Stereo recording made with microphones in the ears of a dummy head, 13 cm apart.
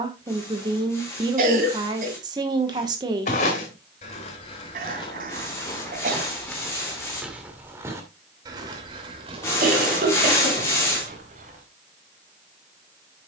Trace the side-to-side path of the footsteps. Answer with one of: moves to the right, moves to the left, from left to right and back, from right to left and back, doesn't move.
moves to the right.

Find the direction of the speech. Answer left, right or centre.
right.